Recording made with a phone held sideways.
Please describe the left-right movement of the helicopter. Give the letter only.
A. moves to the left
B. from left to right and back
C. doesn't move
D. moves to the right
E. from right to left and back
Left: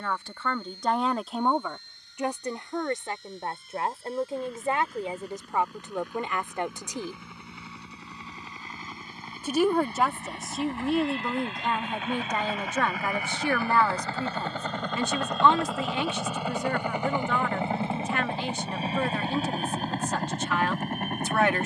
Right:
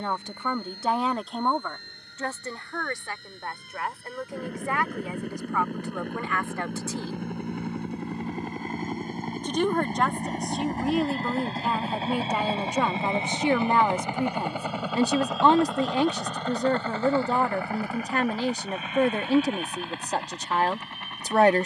A.